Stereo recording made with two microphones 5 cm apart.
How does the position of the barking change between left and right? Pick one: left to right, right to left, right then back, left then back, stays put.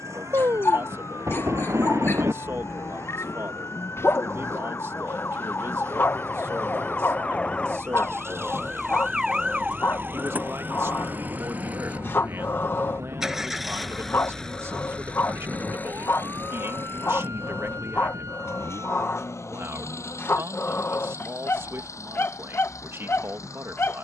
stays put.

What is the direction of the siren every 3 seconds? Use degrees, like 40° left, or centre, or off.
70° left, 50° left, 20° left, 30° right, 60° right, 70° right, 80° right, 80° right.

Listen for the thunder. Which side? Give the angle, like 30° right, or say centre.
70° right.